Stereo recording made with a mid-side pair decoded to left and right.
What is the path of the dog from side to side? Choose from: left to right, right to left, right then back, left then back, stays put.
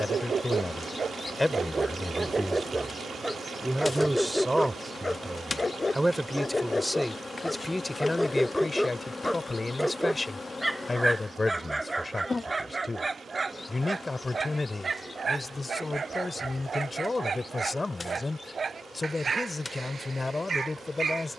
left then back.